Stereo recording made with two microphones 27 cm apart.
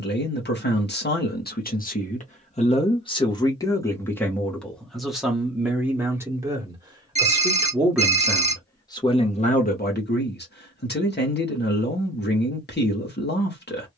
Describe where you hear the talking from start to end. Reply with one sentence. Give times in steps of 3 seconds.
You can hear the talking on the left from 0 s, in the centre from 3 s and on the left from 9 s.